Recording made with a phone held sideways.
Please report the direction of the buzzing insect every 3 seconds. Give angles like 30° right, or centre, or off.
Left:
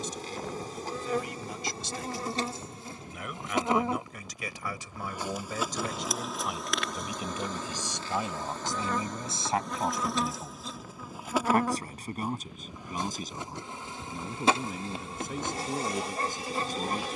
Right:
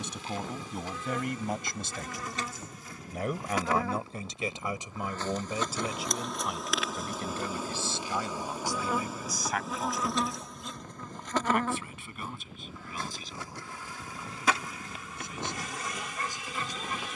40° left, 20° left, 10° right, centre, 20° left, 30° left.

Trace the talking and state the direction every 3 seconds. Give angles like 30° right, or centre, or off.
60° right, 20° right, 10° left, 30° left, 40° left, 50° left.